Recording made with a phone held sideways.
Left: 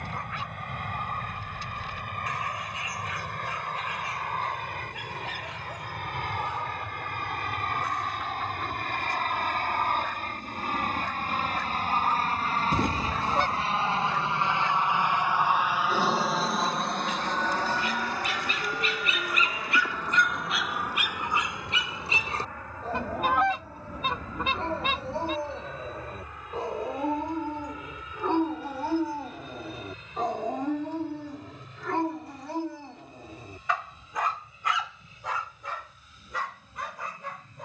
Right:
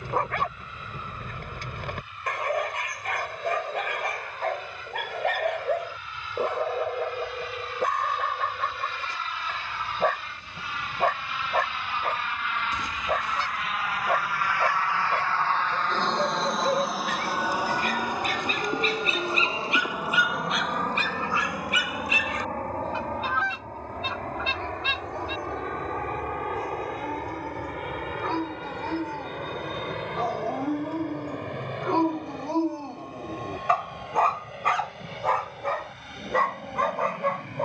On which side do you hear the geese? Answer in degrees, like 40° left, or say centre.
60° left.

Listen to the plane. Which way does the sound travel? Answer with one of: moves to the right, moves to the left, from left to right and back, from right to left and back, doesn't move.
moves to the right.